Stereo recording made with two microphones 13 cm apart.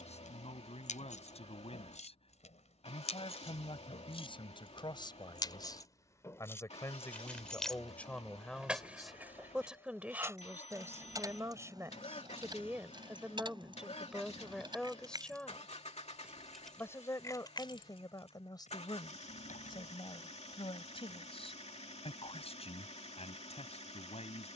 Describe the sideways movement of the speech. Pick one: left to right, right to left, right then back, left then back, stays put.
right then back.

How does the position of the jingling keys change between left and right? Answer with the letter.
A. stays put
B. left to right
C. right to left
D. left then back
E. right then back
E.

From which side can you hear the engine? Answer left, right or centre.
left.